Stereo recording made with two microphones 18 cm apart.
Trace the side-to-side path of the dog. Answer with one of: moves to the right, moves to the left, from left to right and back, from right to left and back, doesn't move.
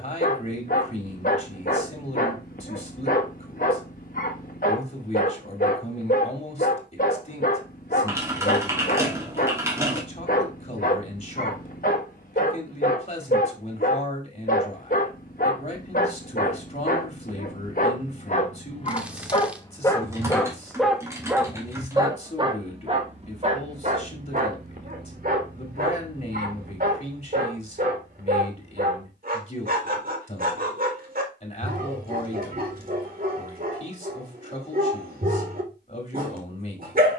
moves to the right.